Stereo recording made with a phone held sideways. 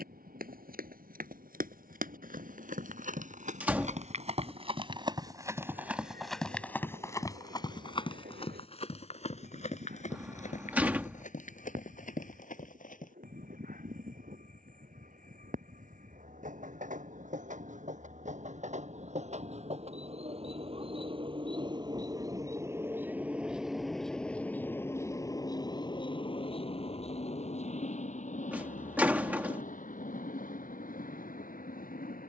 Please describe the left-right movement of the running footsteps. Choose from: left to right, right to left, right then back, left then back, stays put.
right to left.